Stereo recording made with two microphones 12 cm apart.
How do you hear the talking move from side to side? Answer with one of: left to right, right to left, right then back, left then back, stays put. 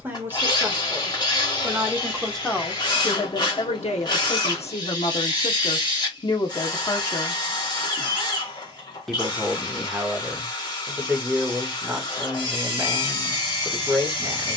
left then back.